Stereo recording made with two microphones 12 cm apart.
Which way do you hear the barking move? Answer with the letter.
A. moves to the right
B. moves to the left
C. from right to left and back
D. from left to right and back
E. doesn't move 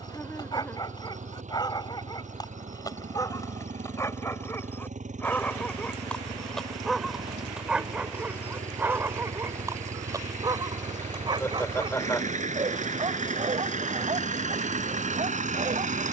A.